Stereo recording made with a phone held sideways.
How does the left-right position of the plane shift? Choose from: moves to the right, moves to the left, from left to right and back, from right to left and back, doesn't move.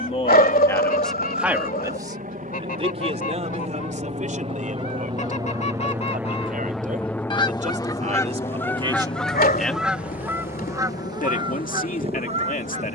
moves to the left.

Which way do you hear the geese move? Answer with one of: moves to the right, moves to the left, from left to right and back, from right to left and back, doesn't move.
moves to the right.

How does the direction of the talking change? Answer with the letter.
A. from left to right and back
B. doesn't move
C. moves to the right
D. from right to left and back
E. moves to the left
A.